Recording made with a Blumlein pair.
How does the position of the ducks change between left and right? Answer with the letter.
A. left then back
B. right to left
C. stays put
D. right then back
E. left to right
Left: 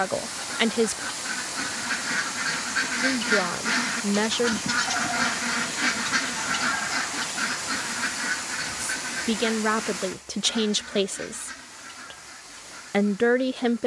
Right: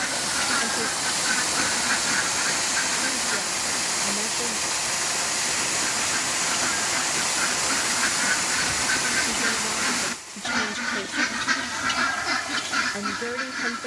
A.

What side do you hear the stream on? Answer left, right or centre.
right.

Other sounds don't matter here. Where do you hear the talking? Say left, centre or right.
left.